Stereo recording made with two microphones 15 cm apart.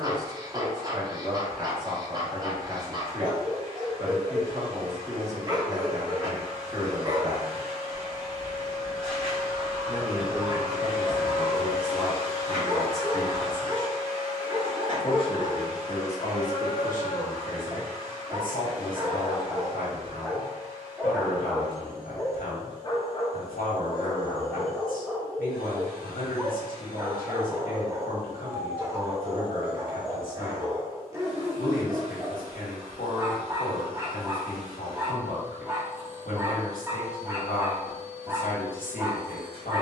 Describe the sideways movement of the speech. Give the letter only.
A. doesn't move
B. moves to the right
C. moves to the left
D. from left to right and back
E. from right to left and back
C.